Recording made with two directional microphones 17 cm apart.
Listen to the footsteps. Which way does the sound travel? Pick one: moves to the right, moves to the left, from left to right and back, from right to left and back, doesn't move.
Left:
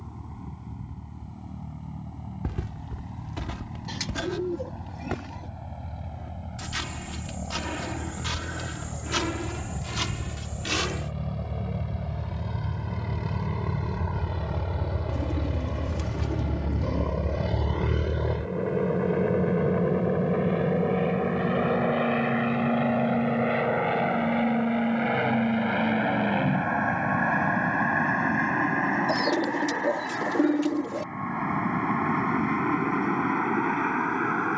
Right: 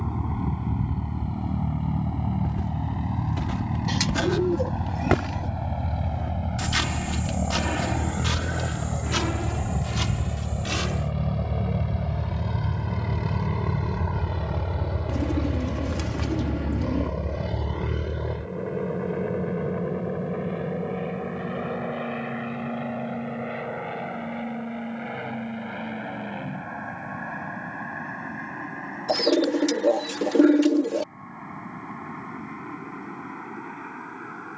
from left to right and back.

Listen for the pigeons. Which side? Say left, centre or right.
right.